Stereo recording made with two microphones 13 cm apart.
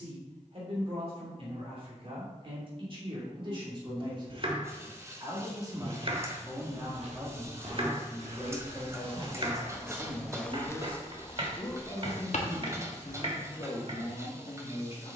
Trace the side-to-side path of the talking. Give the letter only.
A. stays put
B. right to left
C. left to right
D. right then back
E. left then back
B.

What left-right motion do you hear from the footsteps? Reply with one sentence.
In this clip you hear the footsteps move from right to left.